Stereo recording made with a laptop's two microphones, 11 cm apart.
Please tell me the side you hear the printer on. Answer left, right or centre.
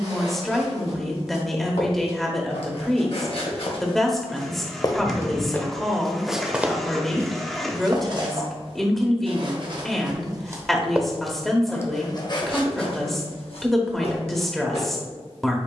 centre.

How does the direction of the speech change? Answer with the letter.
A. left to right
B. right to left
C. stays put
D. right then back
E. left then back
C.